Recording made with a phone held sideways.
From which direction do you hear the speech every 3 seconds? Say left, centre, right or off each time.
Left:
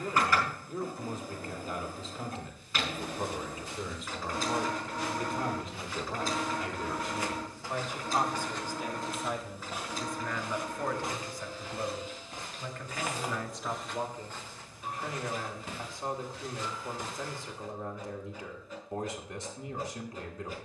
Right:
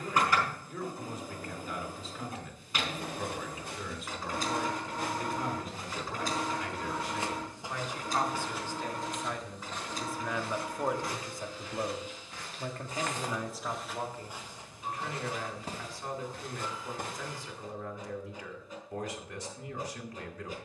left, left, left, centre, centre, left, left.